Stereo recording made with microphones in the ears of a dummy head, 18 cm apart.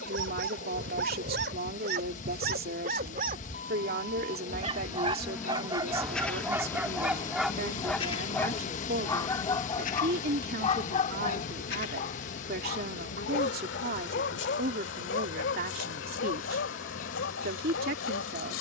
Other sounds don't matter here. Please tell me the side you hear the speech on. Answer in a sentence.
You can hear the speech on the right.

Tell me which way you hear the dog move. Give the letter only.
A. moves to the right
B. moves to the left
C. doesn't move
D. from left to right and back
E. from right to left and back
B.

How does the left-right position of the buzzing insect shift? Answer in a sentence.
You can hear the buzzing insect travel towards the left.